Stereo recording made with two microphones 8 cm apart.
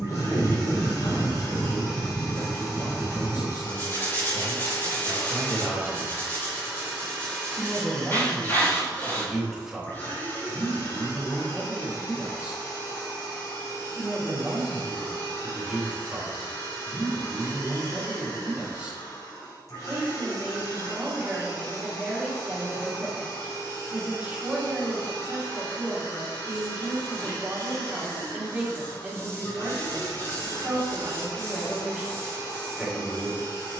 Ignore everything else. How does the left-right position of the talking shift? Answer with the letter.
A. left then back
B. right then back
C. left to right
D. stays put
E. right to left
C.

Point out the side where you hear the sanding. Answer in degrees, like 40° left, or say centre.
30° left.